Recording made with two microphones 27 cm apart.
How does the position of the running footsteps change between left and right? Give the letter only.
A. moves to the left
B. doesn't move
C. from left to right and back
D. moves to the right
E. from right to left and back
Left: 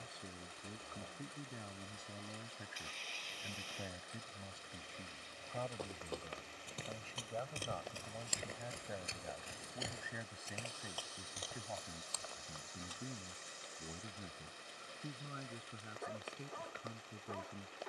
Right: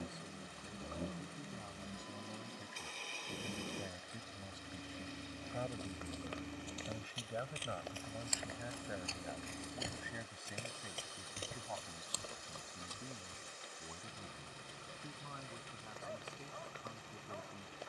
D.